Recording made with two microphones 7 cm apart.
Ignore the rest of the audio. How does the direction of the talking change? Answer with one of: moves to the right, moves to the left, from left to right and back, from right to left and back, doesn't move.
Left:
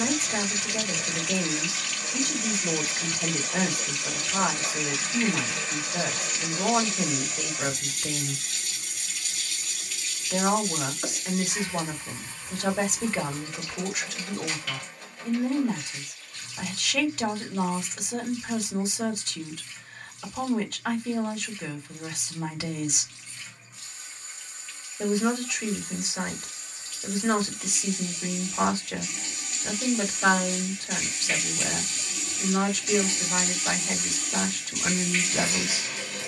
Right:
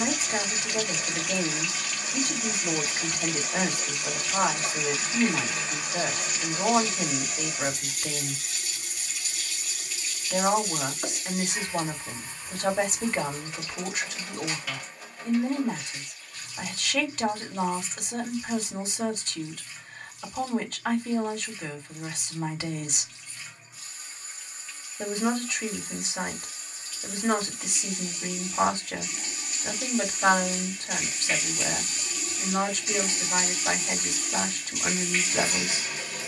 doesn't move.